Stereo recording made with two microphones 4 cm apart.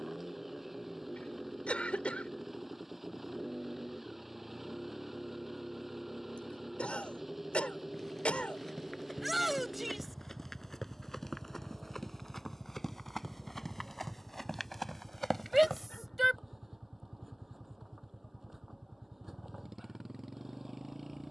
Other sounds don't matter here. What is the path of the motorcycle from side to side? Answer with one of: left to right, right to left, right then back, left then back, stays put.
stays put.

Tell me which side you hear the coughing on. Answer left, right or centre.
left.